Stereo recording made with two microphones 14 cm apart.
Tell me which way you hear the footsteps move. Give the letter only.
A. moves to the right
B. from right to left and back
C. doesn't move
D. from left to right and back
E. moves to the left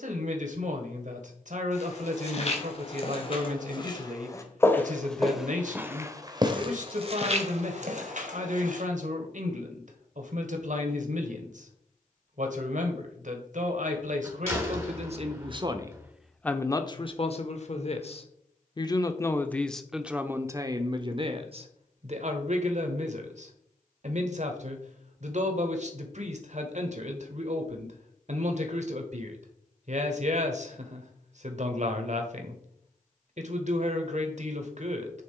A.